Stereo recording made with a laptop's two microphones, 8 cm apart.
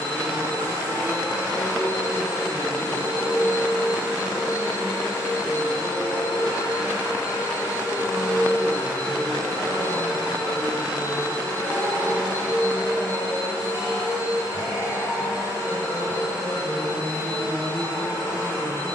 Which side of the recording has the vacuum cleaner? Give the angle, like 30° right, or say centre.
40° right.